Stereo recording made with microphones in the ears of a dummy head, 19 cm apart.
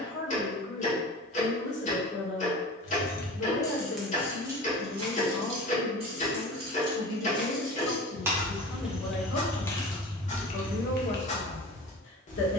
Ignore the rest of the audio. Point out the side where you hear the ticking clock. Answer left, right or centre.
left.